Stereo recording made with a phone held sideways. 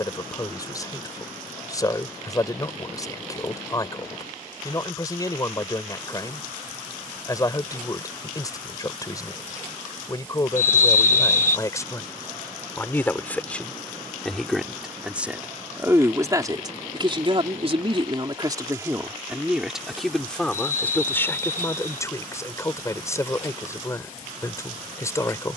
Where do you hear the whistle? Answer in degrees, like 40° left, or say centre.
60° left.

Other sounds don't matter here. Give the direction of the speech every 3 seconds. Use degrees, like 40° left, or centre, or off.
20° left, 20° left, 20° left, 20° left, 10° left, 30° right, 10° right, 20° left, 20° left.